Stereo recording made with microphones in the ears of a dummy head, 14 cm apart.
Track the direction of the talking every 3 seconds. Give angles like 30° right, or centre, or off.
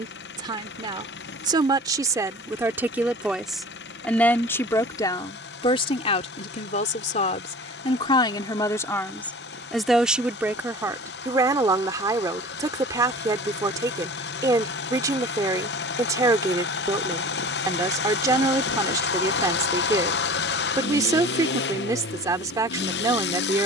20° right, 20° left, 40° left, 10° right, 20° right, 20° right, 20° right, 20° right.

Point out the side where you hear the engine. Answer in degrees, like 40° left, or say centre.
70° left.